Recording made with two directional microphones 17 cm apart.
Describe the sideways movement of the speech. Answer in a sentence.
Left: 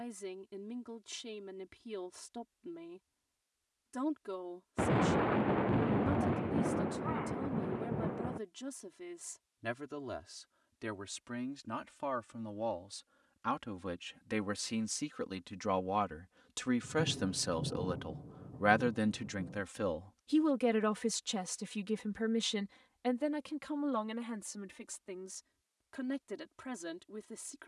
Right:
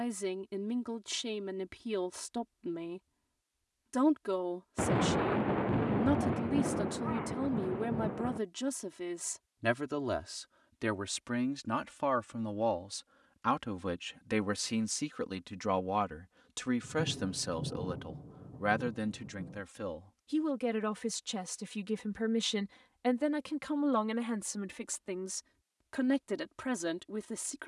You can hear the speech move from right to left and back again.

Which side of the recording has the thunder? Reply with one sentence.
You can hear the thunder in the centre.